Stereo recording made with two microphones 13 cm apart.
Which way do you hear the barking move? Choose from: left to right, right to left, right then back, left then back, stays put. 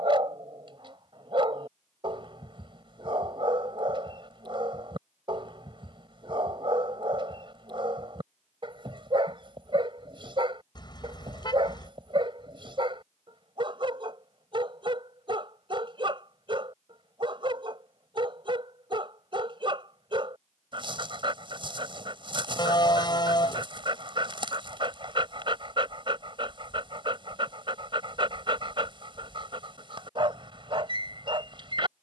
stays put.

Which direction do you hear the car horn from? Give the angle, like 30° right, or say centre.
30° left.